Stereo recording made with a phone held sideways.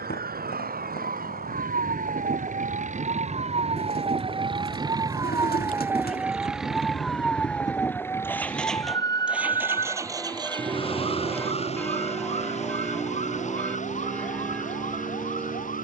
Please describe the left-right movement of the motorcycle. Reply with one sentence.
In this clip you hear the motorcycle move from left to right.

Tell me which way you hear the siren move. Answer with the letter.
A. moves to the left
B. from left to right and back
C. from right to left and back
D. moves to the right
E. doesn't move
A.